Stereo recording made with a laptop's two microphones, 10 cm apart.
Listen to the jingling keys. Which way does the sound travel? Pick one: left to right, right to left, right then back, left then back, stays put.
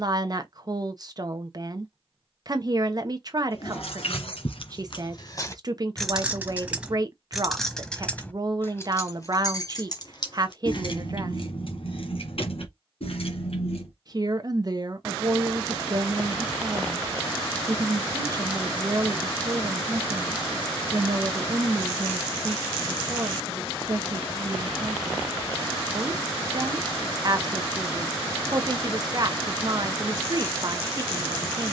right then back.